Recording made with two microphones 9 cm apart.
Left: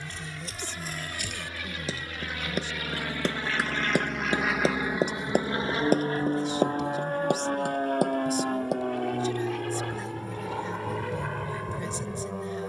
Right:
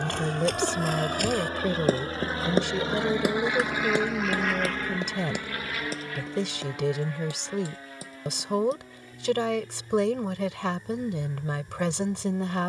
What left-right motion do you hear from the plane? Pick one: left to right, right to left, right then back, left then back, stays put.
right to left.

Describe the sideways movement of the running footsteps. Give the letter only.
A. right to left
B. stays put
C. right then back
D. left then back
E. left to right
A.